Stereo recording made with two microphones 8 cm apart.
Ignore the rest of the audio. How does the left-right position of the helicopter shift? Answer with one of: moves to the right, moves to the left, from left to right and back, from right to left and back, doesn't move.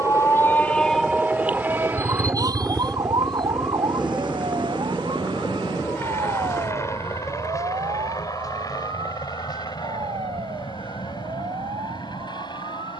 moves to the left.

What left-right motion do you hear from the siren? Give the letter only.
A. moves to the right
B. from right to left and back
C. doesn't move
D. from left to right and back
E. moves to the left
A.